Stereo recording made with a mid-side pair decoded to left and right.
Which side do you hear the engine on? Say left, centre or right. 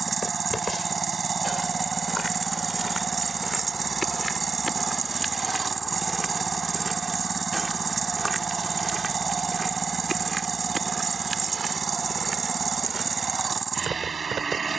right.